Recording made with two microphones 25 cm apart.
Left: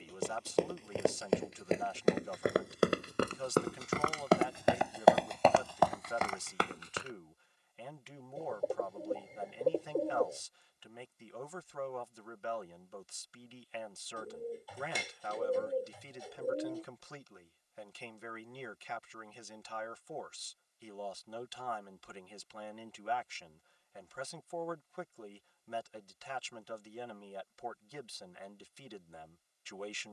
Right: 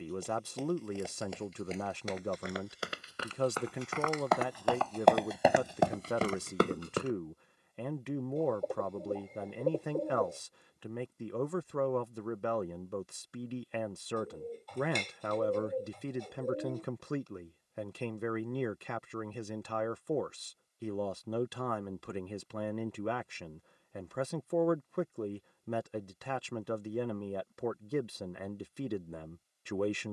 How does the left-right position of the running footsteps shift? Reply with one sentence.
You can hear the running footsteps travel towards the right.